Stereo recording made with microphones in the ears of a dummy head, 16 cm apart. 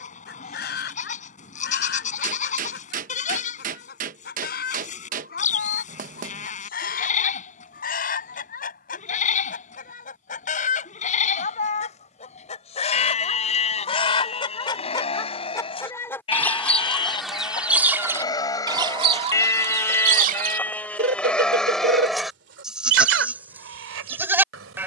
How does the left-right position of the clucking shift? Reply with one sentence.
You can hear the clucking move from left to right.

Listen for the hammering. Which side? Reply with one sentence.
In this clip you hear the hammering on the right.